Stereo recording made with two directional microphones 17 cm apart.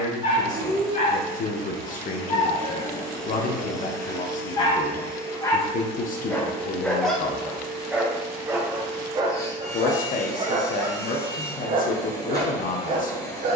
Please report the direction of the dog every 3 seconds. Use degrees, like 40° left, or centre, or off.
40° left, 30° left, centre, 30° right, 50° right.